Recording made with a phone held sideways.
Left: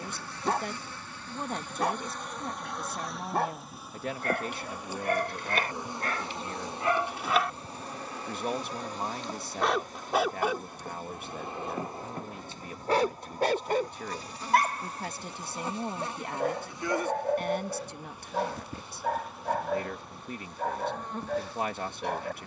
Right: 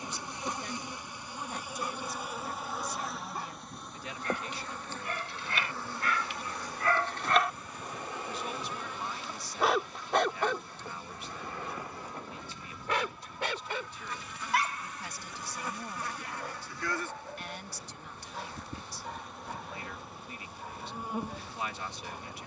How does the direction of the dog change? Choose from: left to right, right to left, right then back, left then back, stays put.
right then back.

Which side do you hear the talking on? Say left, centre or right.
left.